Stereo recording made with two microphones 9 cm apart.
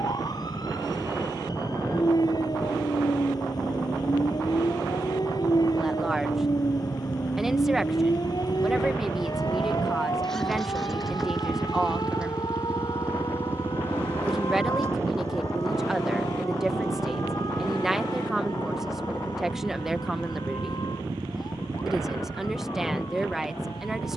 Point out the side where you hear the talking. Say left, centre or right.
centre.